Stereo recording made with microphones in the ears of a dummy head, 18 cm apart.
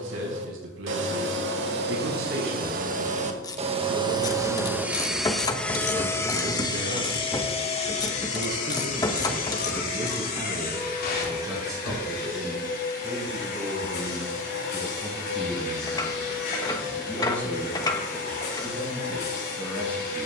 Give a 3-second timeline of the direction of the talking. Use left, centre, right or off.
right, right, right, right, centre, centre, centre.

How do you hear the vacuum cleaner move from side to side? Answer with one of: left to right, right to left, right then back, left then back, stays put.
right to left.